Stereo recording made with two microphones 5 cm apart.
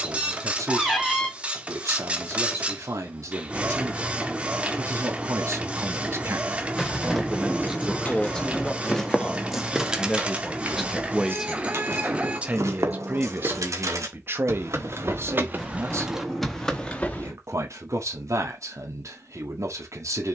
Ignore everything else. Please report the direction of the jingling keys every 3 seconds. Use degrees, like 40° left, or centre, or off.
off, off, 20° left, 20° right, 60° right, 10° right, off.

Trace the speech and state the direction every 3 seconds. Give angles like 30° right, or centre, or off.
70° right, 70° right, 10° right, centre, 40° right, 60° right, 70° right.